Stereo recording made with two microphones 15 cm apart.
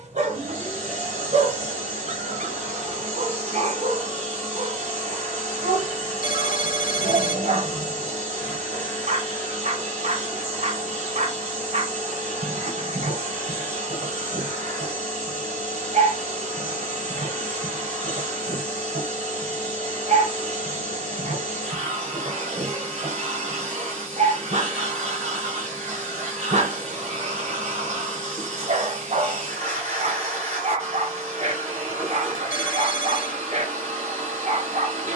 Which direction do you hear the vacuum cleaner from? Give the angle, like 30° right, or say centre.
50° right.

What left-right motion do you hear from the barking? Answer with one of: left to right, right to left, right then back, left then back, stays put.
stays put.